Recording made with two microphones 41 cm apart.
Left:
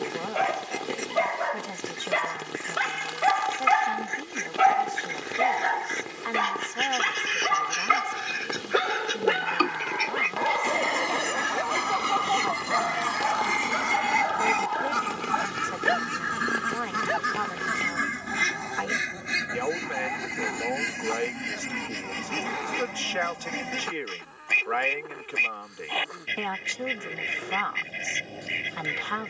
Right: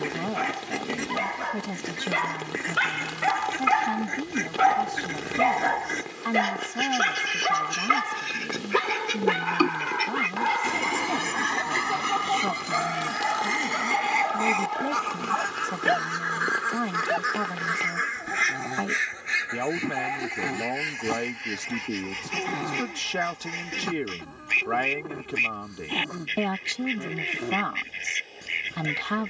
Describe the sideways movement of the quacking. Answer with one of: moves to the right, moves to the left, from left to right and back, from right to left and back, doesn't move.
moves to the left.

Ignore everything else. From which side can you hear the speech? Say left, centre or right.
right.